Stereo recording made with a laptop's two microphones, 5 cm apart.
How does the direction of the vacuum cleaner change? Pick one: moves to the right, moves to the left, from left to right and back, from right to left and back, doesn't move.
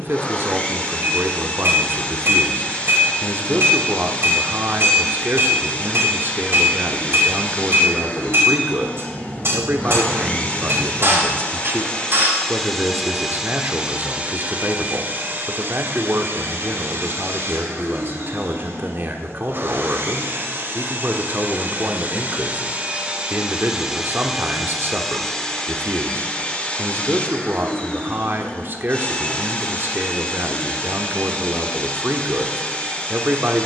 from left to right and back.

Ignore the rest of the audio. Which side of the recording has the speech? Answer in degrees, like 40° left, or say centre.
40° right.